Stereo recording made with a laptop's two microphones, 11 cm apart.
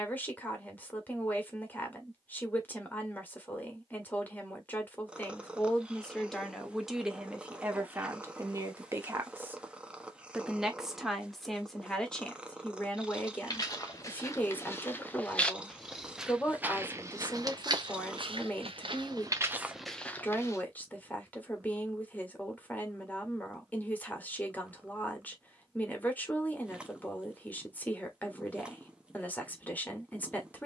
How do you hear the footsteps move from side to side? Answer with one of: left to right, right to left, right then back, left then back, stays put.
right then back.